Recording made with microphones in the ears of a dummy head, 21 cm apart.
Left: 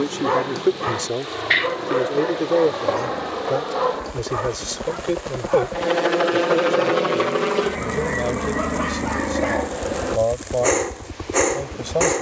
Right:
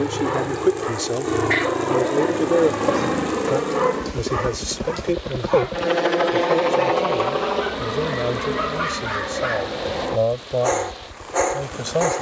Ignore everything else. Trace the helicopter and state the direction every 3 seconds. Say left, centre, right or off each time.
right, right, left, left.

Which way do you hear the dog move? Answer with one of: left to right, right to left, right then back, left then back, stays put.
right then back.